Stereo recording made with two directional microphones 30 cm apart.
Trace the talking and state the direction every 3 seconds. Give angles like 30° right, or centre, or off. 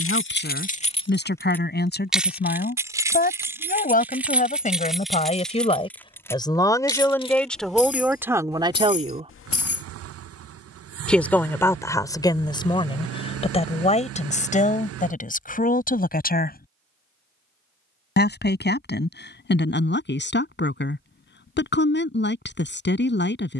30° left, 20° left, centre, centre, 20° left, 30° left, 40° left, 40° left.